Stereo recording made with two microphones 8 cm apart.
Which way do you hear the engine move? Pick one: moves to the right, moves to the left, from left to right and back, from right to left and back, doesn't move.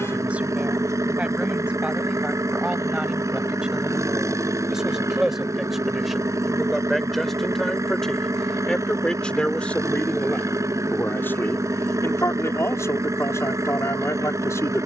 doesn't move.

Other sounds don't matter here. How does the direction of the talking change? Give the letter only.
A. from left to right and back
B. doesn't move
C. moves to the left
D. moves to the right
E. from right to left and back
C.